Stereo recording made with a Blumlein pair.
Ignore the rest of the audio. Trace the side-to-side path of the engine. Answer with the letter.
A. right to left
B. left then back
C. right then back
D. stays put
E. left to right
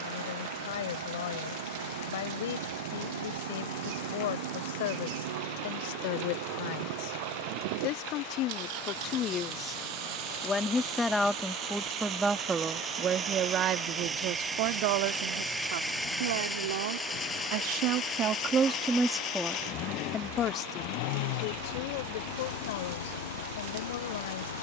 A.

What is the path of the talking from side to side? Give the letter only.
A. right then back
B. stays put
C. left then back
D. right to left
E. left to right
A.